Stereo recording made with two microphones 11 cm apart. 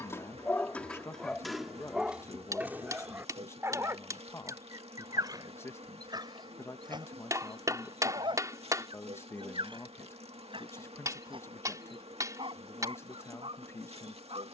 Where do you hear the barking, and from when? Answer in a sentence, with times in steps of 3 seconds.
You can hear the barking in the centre from 0 s and on the right from 3 s.